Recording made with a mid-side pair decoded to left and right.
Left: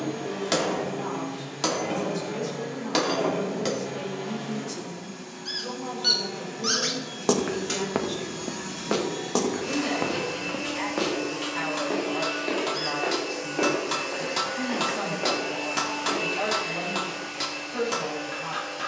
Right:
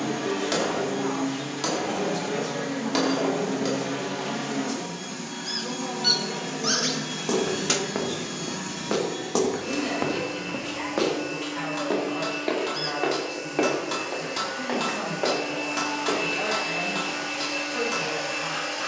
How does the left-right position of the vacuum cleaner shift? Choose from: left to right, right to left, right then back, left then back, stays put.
left then back.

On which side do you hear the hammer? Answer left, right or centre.
left.